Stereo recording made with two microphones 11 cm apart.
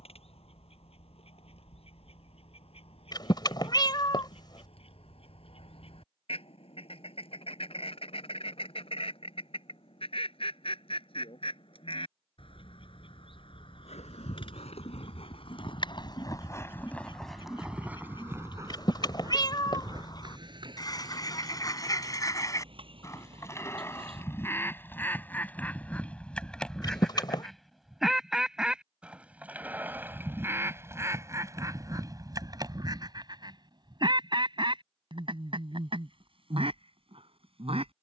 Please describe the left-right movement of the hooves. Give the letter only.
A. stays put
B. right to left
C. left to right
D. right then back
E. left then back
C.